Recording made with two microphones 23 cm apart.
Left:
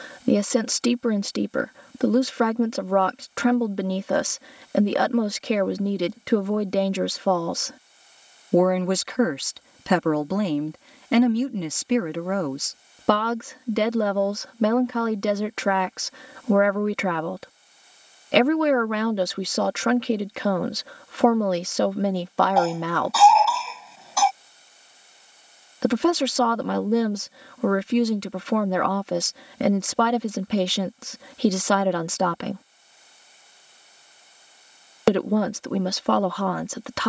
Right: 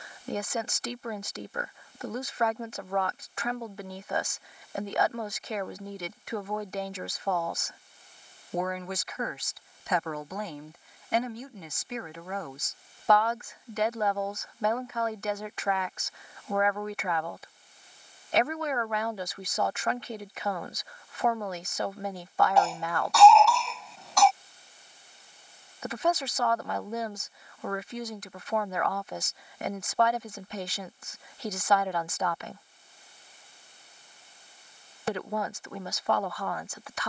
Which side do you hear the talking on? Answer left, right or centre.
left.